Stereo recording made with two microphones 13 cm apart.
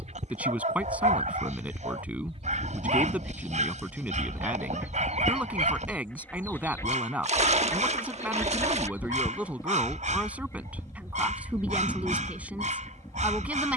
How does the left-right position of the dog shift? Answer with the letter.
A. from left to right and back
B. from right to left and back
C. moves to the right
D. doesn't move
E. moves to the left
D.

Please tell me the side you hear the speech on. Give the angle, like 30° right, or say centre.
10° right.